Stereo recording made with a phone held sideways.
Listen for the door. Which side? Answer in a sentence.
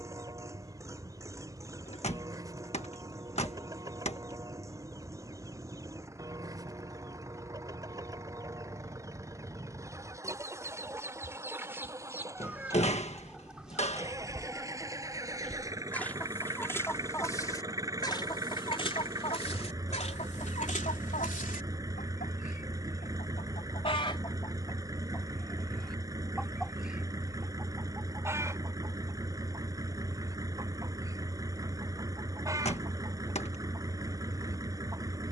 You can hear the door on the left.